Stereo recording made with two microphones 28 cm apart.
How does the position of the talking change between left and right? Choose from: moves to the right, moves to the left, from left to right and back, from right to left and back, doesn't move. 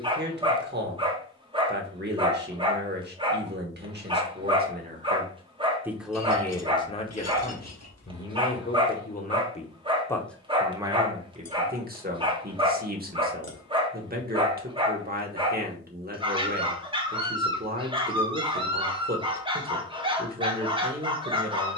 from right to left and back.